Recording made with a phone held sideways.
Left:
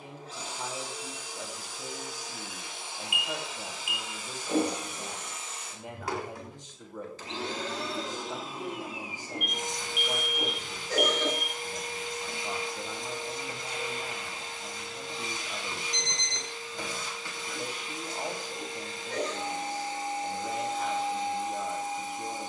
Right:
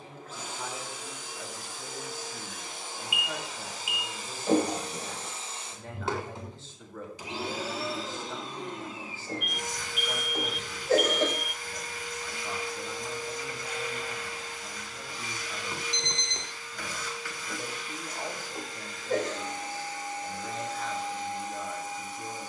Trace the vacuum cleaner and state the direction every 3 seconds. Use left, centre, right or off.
right, right, centre, left, left, left, left, left.